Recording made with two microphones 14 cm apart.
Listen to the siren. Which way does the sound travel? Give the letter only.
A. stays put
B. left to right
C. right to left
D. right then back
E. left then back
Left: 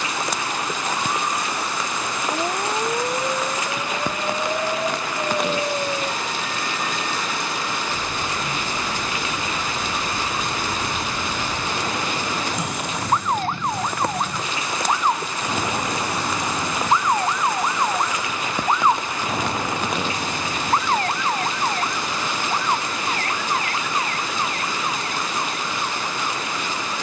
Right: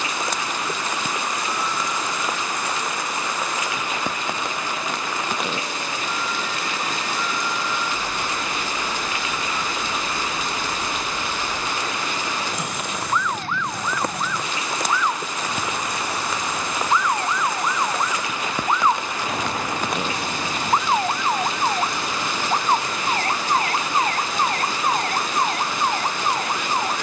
B.